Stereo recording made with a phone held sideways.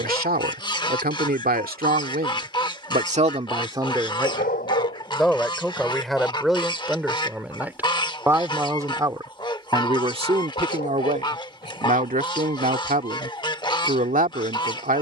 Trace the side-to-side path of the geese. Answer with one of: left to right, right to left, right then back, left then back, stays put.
stays put.